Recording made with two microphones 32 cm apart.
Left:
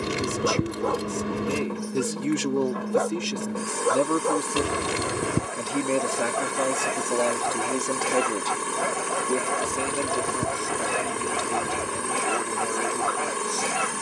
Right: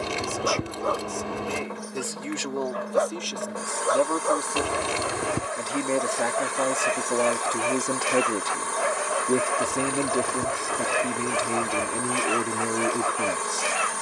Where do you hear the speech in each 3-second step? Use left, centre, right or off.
left, left, centre, right, right.